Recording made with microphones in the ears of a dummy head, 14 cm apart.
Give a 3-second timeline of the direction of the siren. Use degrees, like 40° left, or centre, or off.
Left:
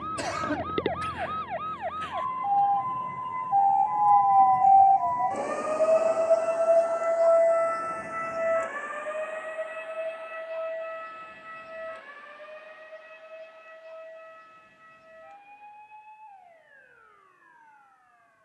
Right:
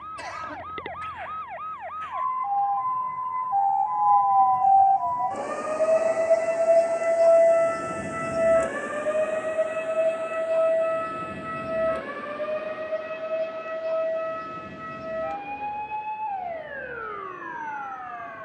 50° left, 20° left, 30° right, 60° right, 70° right, 80° right.